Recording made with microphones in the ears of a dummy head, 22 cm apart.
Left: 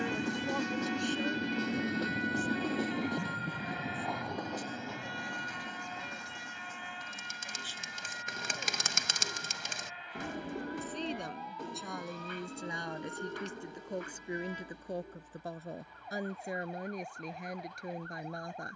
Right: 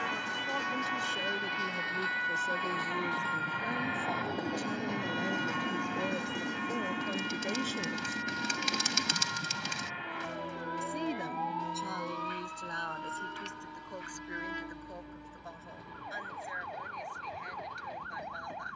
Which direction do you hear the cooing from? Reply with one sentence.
You can hear the cooing on the left.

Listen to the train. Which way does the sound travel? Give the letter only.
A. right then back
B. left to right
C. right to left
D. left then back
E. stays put
B.